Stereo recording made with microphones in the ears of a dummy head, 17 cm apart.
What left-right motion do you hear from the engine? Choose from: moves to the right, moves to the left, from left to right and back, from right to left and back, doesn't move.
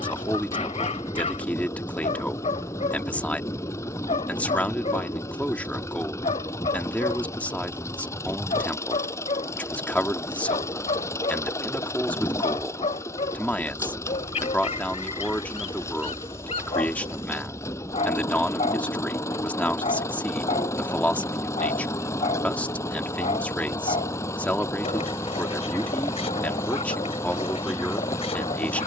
doesn't move.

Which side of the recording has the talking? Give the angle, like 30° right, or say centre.
10° left.